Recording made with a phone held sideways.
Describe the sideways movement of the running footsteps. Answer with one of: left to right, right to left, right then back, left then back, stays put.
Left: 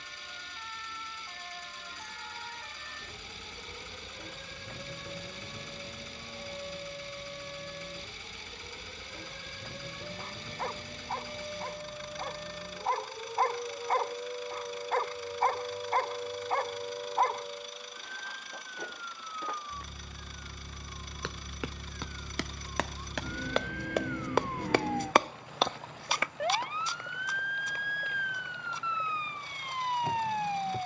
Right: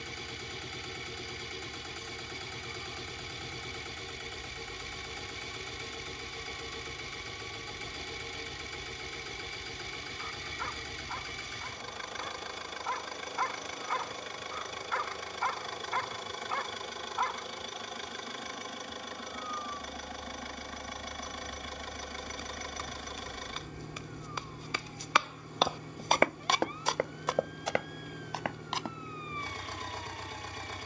left to right.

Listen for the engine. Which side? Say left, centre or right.
right.